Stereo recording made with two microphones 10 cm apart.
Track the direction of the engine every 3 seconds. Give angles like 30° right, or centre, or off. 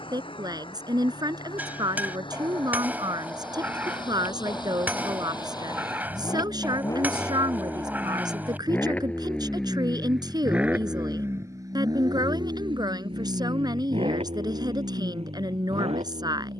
50° left, 40° left, 30° left, 10° right, 60° right, 80° right.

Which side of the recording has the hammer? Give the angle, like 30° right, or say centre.
20° right.